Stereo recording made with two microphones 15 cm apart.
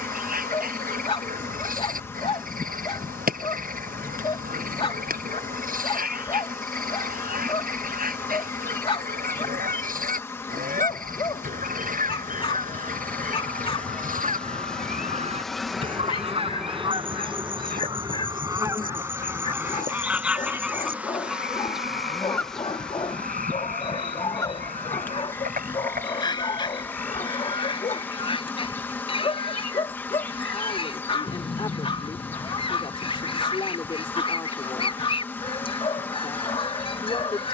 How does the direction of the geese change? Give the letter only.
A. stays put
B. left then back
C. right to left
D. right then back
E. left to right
C.